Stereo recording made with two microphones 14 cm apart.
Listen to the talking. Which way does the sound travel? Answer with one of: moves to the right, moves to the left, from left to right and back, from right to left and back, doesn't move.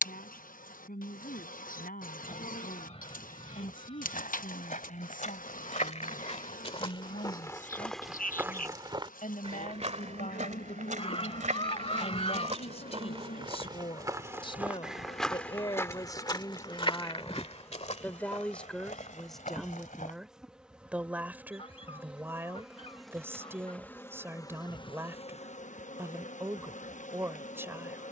moves to the right.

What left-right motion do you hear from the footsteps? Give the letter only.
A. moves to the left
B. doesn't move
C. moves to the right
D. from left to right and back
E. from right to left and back
D.